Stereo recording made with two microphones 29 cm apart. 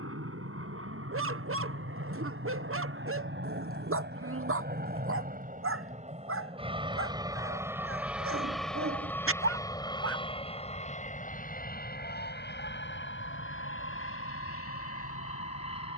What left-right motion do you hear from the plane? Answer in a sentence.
You can hear the plane move to the left.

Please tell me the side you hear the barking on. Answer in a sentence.
In this clip you hear the barking on the right.